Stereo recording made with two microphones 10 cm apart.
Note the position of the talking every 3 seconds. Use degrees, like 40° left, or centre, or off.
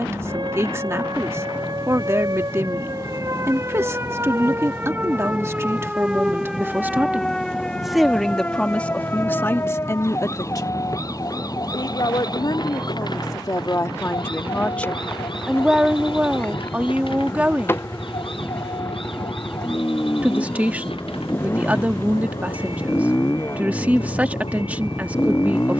30° right, 30° right, 10° right, 30° left, 40° left, 10° right, 20° right, 20° right, 20° right.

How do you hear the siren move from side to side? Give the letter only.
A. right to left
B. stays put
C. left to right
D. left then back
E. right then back
A.